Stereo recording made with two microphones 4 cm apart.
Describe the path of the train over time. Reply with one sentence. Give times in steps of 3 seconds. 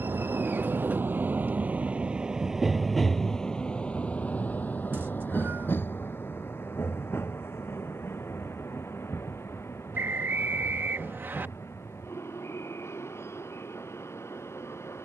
You can hear the train on the right from 0 s and on the left from 3 s.